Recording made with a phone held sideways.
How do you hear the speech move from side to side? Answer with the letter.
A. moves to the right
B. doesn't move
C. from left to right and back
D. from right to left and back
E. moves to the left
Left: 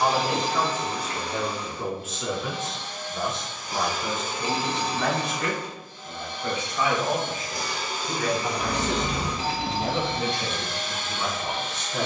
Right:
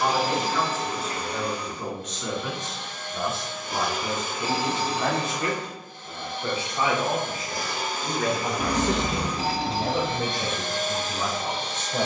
A.